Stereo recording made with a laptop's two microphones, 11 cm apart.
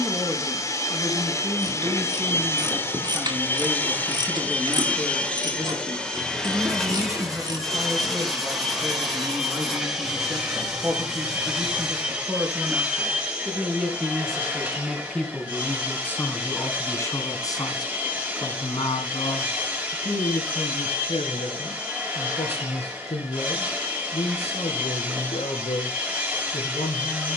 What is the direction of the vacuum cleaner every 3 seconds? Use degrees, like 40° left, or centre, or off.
30° left, 10° left, centre, 10° right, 10° right, 20° right, 20° right, 20° right, 20° right.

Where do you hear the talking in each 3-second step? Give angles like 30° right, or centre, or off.
20° right, 20° right, 20° right, 20° right, 10° right, 20° left, 60° left, 80° left, 80° left.